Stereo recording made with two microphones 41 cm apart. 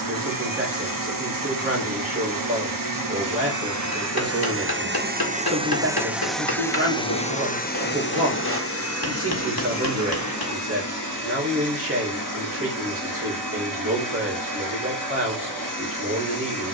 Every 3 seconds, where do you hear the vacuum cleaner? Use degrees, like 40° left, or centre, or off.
50° right, 30° right, 20° left, 40° left, 50° left, 50° left.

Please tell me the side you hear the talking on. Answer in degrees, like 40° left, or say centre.
30° right.